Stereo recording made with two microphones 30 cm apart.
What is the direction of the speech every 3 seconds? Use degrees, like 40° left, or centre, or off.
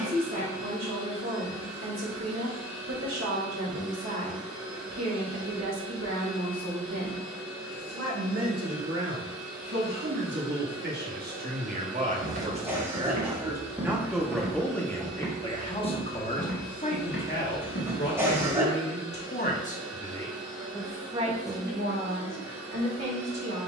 70° right, 70° right, 60° right, 40° right, 10° right, 30° left, 30° left, 40° right.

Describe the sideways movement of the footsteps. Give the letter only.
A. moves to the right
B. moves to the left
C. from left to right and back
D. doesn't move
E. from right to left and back
B.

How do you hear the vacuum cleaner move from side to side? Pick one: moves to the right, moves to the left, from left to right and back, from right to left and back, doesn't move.
doesn't move.